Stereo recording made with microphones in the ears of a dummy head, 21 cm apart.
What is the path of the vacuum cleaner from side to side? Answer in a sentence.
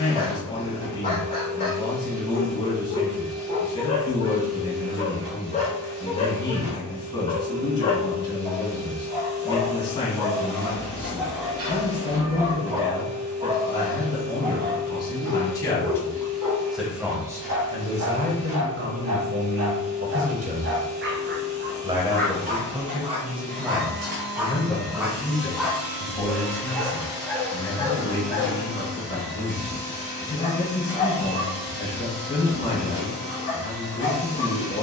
You can hear the vacuum cleaner stay in one place.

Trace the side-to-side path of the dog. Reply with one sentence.
In this clip you hear the dog move from left to right and back again.